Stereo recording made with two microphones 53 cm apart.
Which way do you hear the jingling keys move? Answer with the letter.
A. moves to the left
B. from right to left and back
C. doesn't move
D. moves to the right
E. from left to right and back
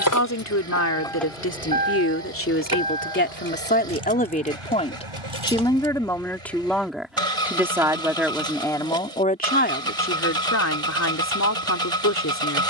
D.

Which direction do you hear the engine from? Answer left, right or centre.
right.